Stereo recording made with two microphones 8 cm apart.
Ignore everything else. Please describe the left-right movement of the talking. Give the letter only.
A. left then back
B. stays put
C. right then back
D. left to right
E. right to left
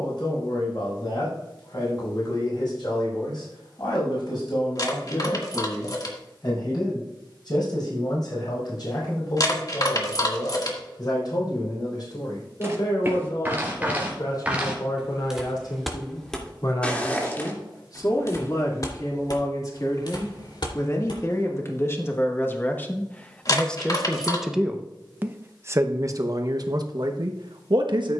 D.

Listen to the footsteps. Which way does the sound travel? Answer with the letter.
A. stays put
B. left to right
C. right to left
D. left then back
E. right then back
C.